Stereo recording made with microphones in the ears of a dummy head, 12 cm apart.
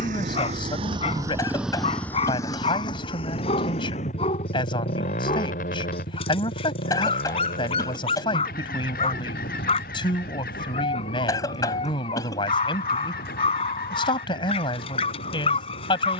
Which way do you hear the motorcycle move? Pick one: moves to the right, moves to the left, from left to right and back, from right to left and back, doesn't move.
moves to the left.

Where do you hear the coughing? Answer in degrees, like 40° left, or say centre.
30° left.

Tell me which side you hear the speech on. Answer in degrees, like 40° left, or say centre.
40° left.